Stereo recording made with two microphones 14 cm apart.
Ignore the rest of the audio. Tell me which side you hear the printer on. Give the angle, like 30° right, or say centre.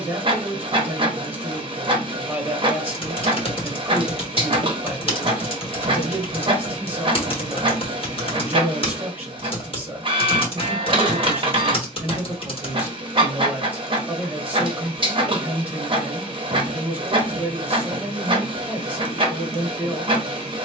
40° right.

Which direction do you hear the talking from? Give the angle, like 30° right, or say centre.
10° right.